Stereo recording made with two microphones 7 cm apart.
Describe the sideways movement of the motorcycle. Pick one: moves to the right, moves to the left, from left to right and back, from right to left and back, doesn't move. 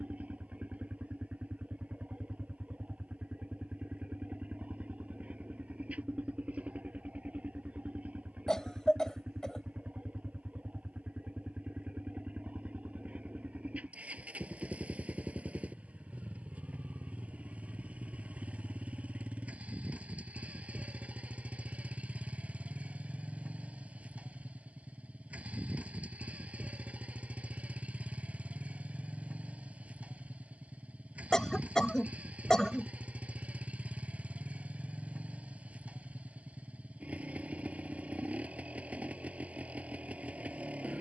doesn't move.